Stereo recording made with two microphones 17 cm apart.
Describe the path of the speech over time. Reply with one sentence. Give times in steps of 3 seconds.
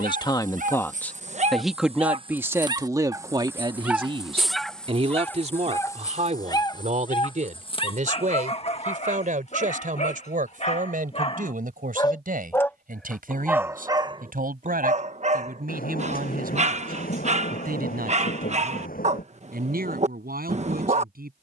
In this clip you hear the speech in the centre from 0 s and on the right from 3 s.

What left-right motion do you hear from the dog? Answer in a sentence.
In this clip you hear the dog go left and come back.